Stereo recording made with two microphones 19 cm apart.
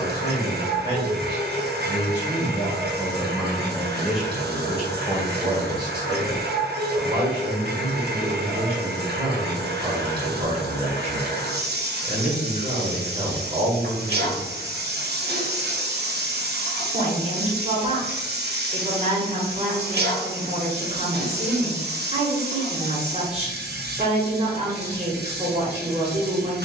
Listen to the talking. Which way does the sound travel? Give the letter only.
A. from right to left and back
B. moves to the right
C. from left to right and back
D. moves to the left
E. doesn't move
B.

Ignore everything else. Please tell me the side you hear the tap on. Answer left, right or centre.
right.